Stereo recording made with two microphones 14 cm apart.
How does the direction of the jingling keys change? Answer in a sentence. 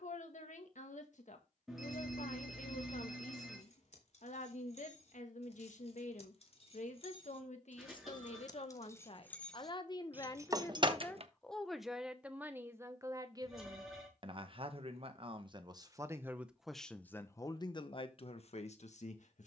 In this clip you hear the jingling keys move to the right.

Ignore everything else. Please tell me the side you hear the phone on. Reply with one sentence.
You can hear the phone in the centre.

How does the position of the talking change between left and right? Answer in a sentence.
You can hear the talking go right and come back.